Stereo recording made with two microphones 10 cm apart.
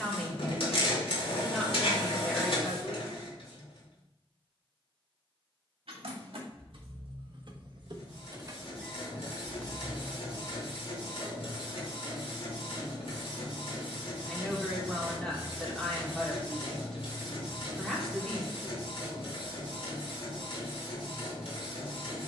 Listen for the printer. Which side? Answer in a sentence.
You can hear the printer on the left.